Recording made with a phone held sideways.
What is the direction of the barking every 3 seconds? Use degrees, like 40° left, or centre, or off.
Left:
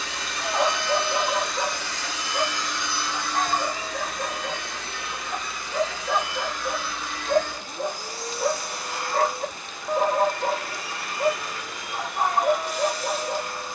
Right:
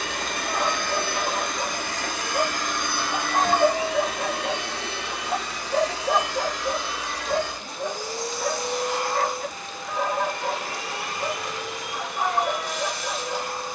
40° left, 60° right, centre, 40° left, 40° left.